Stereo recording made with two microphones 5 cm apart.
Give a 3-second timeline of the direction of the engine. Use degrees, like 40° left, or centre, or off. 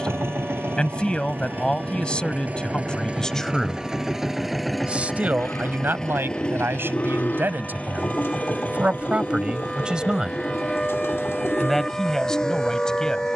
40° right, 10° right, 30° left, 40° left, 50° left.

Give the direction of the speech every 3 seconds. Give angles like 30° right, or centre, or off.
20° left, 10° right, 40° right, 10° right, 10° left.